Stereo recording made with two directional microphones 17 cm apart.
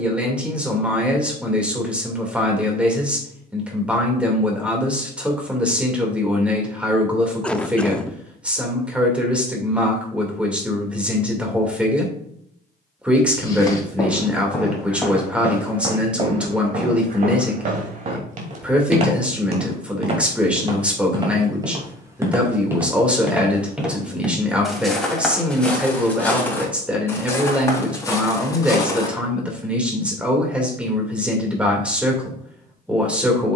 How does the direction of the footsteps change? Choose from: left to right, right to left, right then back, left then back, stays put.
right then back.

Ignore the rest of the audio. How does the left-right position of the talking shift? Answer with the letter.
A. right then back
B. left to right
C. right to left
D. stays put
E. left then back
D.